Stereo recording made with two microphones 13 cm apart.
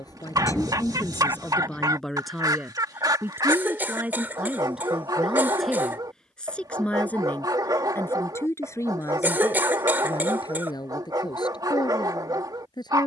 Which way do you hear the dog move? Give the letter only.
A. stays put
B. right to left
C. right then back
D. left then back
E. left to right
A.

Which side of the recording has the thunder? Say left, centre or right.
centre.